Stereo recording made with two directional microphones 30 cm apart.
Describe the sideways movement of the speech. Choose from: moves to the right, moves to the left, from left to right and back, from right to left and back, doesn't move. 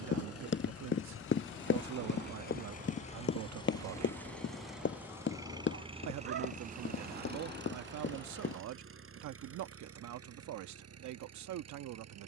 doesn't move.